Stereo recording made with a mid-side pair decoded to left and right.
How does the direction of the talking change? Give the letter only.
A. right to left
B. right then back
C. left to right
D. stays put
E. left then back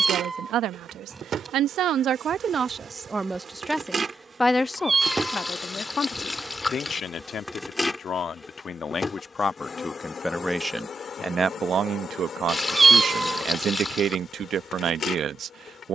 E.